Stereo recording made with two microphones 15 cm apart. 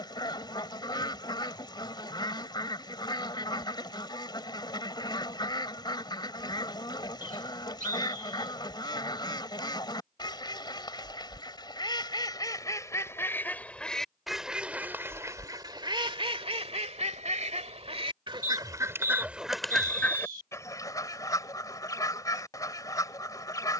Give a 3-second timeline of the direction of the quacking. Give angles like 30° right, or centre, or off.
30° left, 30° left, 30° left, 30° left, 10° left, 40° right, 10° right, 20° left.